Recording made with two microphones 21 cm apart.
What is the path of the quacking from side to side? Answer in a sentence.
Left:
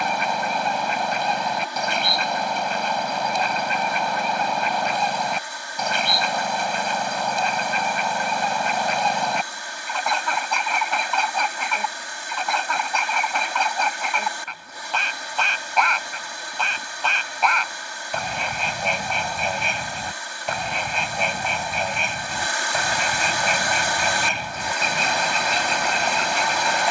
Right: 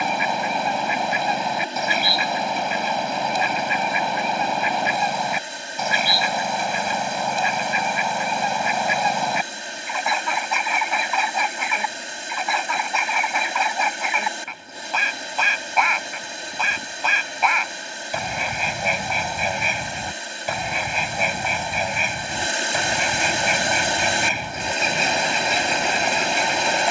You can hear the quacking stay in one place.